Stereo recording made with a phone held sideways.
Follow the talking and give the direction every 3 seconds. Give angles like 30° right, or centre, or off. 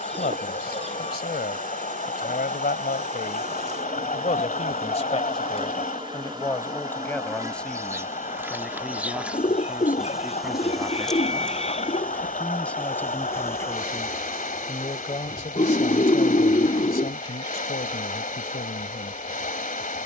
70° left, 50° left, 10° left, 10° right, 20° left, 60° left, 70° left.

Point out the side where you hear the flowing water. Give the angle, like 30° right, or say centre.
60° left.